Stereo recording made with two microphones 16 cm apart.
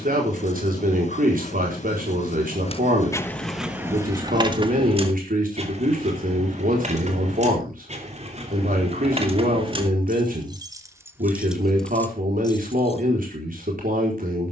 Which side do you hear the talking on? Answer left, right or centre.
right.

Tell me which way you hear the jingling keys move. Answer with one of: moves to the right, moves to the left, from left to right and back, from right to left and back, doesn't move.
from left to right and back.